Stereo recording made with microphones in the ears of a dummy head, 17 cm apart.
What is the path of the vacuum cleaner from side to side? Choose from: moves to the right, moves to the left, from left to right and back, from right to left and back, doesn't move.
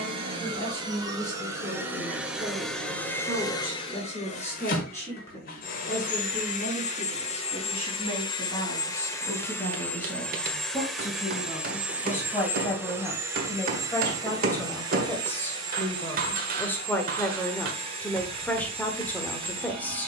from right to left and back.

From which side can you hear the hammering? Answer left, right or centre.
right.